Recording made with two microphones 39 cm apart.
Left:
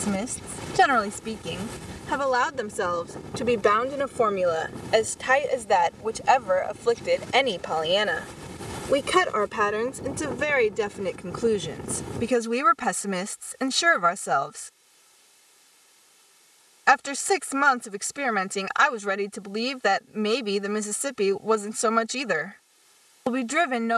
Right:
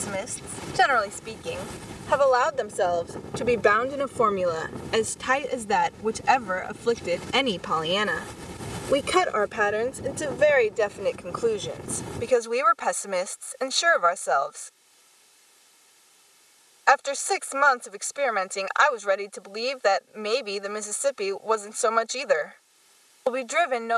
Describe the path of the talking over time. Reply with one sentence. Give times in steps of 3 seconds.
In this clip you hear the talking on the left from 0 s, in the centre from 3 s, on the right from 6 s and on the left from 9 s.